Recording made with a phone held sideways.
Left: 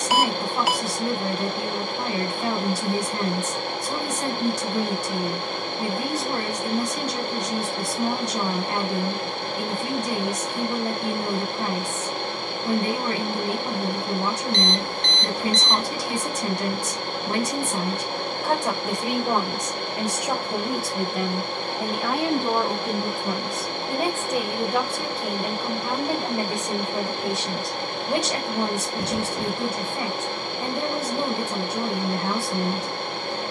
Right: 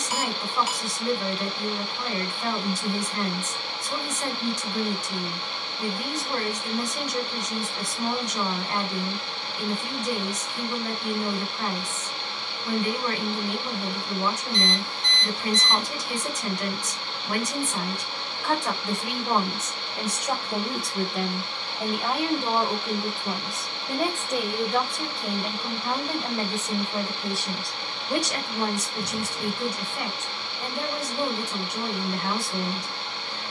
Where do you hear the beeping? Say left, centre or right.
left.